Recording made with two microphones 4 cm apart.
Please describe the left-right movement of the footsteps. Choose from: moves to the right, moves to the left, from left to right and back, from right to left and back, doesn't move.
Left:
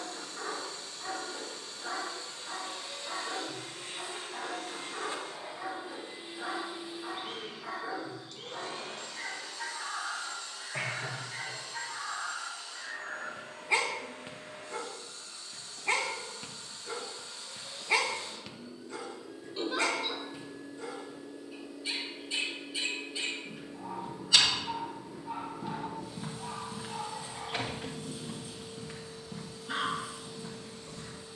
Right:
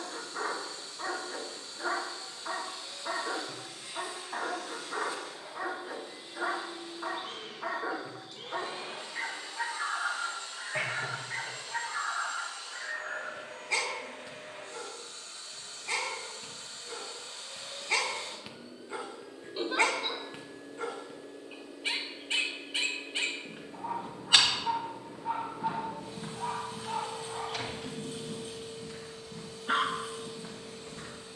from right to left and back.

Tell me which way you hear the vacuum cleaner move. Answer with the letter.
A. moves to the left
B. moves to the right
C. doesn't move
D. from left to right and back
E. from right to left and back
B.